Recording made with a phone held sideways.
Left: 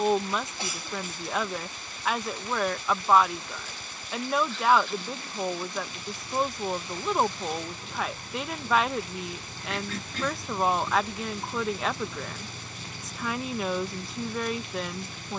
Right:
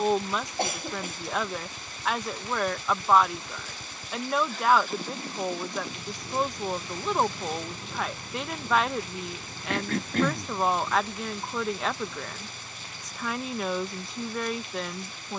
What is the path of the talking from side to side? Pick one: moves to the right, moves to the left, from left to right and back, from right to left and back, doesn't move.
doesn't move.